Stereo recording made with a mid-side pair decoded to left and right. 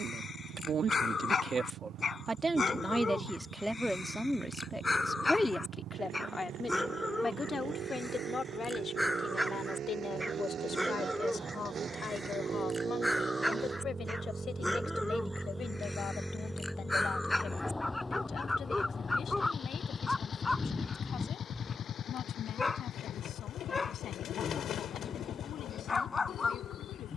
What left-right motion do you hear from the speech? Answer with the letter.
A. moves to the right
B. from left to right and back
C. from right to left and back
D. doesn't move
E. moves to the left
E.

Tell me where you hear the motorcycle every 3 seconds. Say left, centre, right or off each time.
right, right, right, right, right, centre, left, left, left.